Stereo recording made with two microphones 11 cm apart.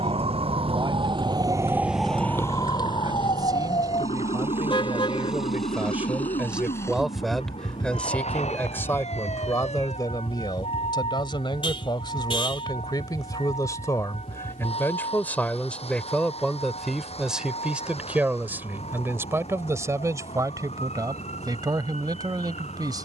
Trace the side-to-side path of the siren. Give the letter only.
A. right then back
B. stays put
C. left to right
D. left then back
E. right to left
E.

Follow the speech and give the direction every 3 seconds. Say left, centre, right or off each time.
right, right, centre, left, left, centre, right, right.